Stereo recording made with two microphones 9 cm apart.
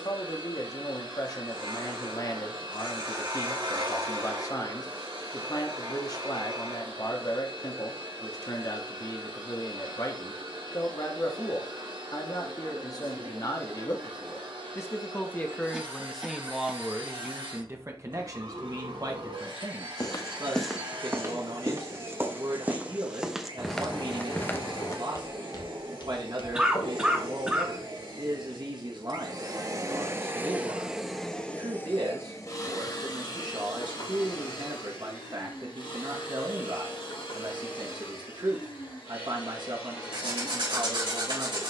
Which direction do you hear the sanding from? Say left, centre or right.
right.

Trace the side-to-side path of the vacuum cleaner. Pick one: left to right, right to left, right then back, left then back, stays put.
right to left.